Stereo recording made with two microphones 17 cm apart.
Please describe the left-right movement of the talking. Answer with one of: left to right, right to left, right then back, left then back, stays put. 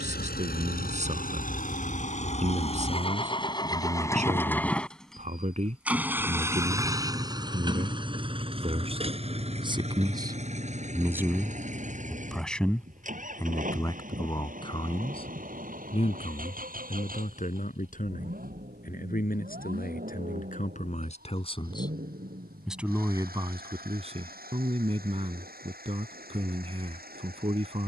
left then back.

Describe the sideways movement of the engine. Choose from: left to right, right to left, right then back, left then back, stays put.
left to right.